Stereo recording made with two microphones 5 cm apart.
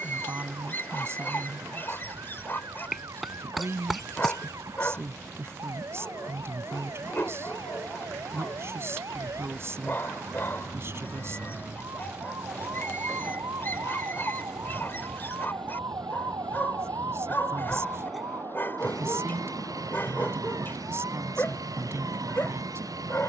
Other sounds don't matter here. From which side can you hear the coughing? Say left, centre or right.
centre.